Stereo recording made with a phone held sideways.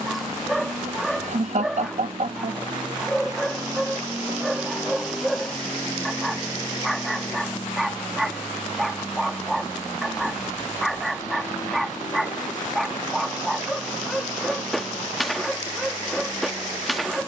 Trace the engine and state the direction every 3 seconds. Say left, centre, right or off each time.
right, centre, left, left, left, left.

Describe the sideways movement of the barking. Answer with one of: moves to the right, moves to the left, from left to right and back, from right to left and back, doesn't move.
doesn't move.